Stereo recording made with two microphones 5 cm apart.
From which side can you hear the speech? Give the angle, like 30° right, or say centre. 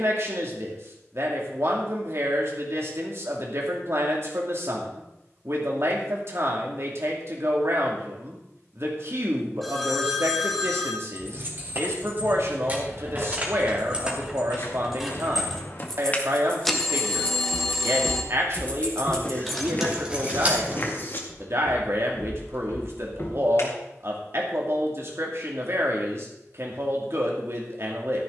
60° right.